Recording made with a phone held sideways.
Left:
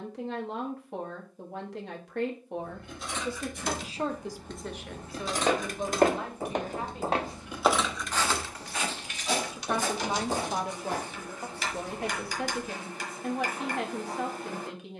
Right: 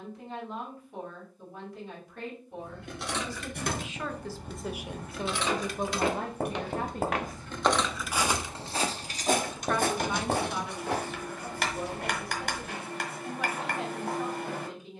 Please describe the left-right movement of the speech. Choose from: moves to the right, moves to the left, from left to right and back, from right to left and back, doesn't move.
from left to right and back.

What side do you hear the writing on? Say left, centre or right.
right.